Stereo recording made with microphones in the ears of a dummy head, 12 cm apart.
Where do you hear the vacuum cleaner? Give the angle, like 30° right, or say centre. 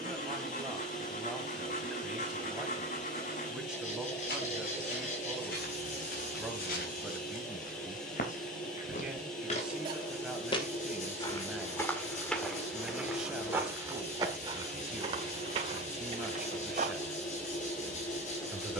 60° left.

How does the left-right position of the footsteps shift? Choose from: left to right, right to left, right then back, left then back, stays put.
left to right.